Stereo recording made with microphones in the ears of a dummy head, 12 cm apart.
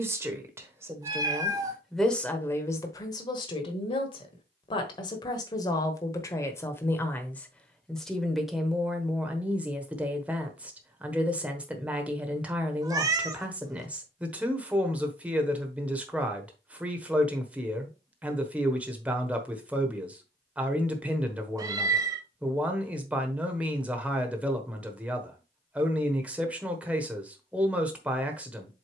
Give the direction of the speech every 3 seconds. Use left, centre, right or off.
centre, left, centre, centre, centre, centre, centre, centre, centre, centre.